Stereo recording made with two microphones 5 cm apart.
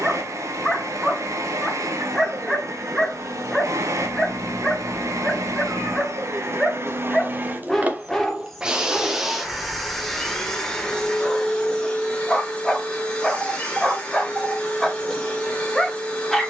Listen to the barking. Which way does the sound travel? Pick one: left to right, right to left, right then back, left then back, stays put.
stays put.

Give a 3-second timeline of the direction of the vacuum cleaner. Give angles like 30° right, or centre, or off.
70° right, 70° right, 40° right, 10° left, 20° left, 20° left.